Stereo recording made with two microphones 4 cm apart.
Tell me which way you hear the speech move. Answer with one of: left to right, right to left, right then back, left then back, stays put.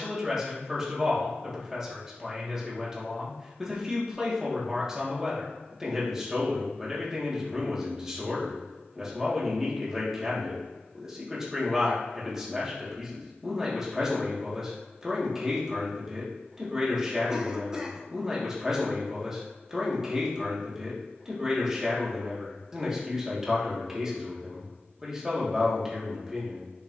stays put.